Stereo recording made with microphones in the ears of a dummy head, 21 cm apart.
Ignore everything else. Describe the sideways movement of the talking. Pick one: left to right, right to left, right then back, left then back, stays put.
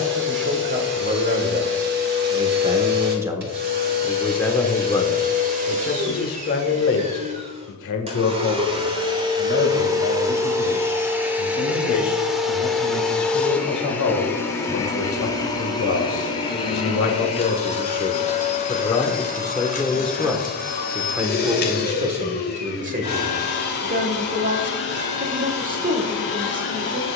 left then back.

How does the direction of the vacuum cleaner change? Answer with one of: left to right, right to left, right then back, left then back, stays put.
right to left.